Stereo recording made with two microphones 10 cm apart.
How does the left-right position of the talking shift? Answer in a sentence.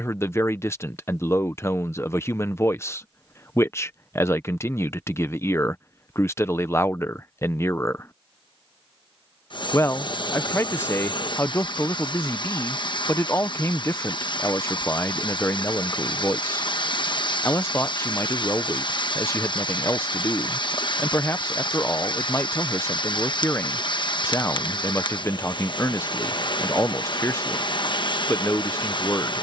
In this clip you hear the talking stay in one place.